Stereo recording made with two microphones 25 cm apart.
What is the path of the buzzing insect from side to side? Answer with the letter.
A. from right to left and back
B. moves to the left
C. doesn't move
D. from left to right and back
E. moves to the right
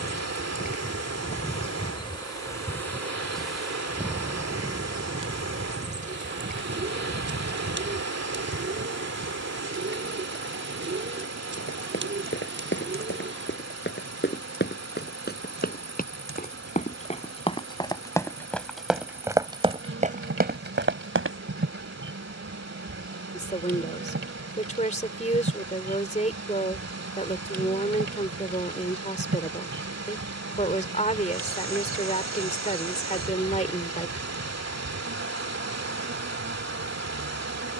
E.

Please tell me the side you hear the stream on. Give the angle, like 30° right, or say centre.
80° right.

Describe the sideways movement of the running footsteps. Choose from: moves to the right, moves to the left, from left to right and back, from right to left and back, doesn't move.
moves to the right.